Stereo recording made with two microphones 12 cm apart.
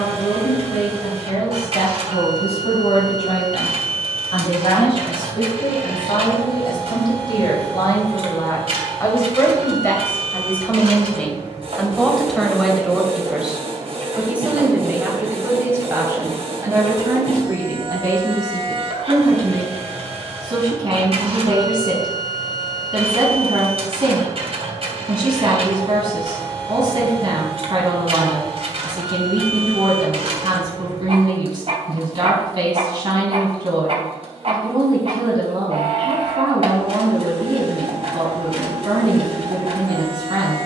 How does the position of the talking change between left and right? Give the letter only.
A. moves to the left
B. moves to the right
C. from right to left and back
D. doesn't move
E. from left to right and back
B.